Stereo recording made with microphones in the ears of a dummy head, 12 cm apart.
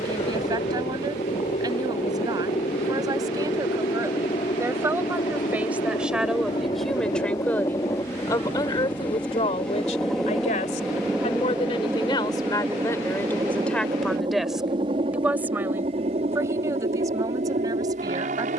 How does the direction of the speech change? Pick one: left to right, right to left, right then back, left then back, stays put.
left then back.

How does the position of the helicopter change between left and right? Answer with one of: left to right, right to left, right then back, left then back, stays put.
left to right.